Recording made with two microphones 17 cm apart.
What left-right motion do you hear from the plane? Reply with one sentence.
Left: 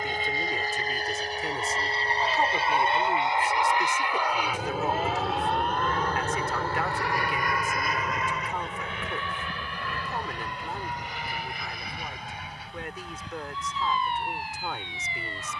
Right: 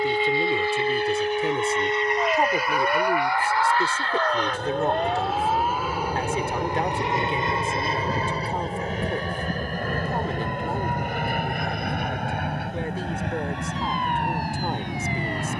You can hear the plane move to the right.